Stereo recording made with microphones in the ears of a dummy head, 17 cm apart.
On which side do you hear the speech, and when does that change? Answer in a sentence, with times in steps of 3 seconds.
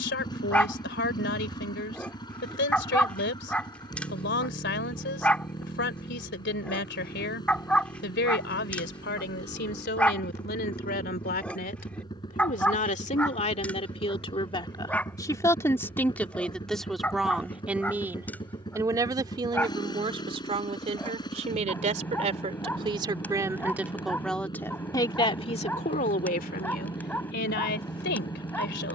You can hear the speech on the left from 0 s, in the centre from 15 s, on the right from 18 s and on the left from 24 s.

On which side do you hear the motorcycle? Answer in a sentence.
You can hear the motorcycle on the left.